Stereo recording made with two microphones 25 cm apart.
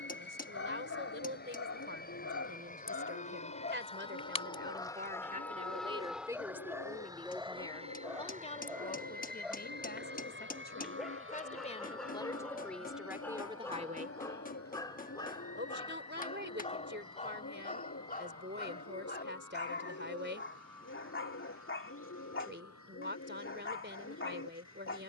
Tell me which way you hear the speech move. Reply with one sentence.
In this clip you hear the speech move from right to left and back again.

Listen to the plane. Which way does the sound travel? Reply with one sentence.
You can hear the plane move from left to right.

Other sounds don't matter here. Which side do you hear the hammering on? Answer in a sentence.
You can hear the hammering on the left.